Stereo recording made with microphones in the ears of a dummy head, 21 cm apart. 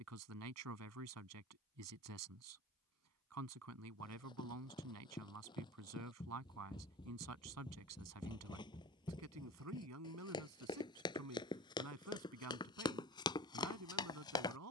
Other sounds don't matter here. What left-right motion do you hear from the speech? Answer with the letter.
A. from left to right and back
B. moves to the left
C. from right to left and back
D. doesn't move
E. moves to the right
D.